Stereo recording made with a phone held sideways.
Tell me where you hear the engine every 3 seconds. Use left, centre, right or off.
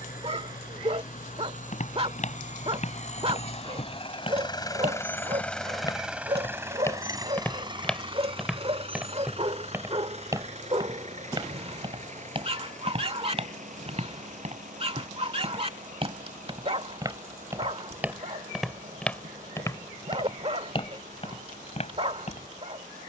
left, left, right, right, right, right, right, right.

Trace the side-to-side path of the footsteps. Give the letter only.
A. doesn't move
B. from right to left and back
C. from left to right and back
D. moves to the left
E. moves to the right
C.